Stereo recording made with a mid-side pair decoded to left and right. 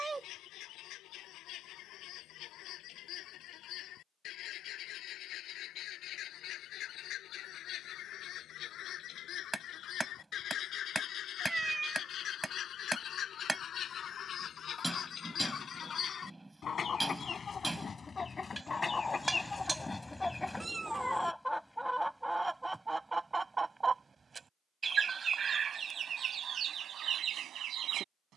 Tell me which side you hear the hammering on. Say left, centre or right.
centre.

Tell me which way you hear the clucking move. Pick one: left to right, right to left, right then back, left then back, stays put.
left to right.